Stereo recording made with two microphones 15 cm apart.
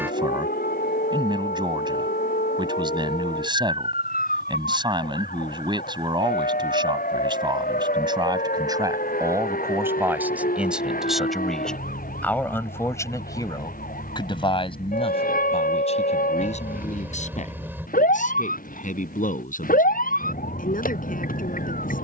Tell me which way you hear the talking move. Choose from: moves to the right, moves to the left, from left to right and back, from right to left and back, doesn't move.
moves to the left.